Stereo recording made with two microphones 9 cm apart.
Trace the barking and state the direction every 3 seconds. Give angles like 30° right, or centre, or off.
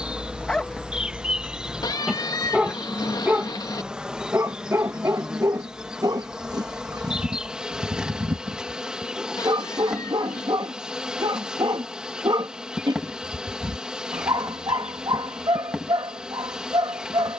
centre, 30° right, 50° right, 50° right, 50° right, 50° right.